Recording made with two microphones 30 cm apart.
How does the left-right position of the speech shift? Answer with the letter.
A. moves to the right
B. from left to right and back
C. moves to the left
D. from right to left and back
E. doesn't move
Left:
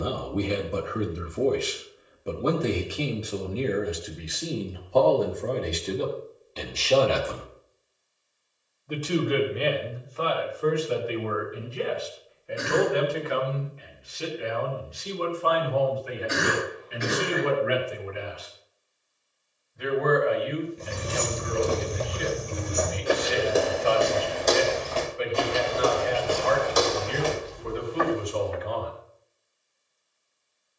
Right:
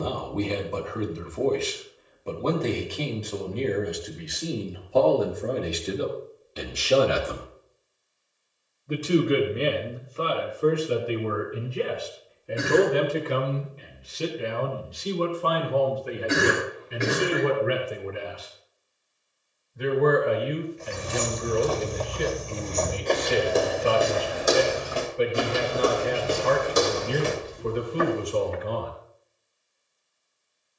A.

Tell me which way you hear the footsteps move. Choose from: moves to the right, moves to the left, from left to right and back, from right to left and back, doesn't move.
moves to the right.